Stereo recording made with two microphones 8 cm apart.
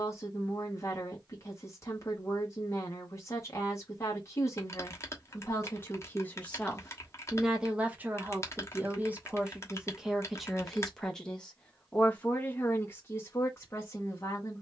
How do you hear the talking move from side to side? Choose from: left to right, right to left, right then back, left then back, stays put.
right then back.